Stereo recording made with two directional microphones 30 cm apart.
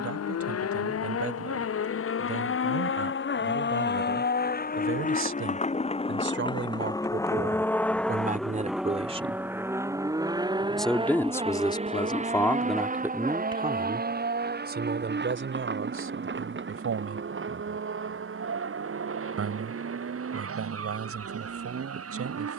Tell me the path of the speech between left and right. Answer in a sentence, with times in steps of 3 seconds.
You can hear the speech on the right from 0 s, in the centre from 9 s and on the right from 15 s.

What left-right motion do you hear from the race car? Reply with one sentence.
In this clip you hear the race car travel towards the right.